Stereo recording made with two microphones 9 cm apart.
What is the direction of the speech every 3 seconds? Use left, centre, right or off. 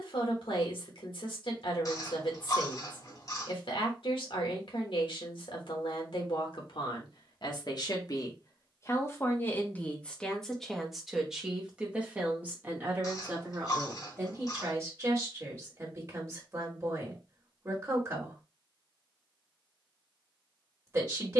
left, left, left, centre, right, right, right.